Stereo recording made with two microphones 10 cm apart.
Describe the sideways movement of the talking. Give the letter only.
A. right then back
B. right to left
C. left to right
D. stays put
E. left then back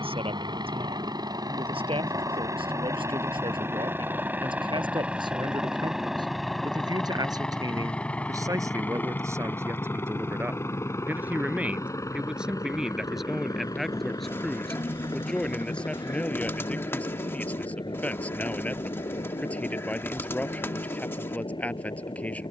B.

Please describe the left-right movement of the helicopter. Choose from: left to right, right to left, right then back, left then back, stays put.
right to left.